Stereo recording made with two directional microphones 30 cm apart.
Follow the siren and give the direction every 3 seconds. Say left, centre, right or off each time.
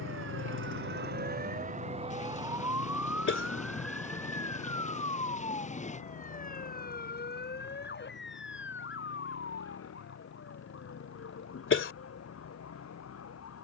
right, centre, left, left, left.